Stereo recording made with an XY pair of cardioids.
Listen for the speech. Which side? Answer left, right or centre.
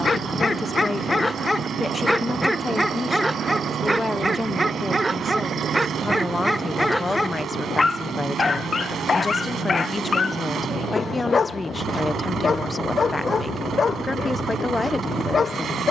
left.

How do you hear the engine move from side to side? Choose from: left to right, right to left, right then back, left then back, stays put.
stays put.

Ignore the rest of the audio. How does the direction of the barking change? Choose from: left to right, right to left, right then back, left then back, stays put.
right then back.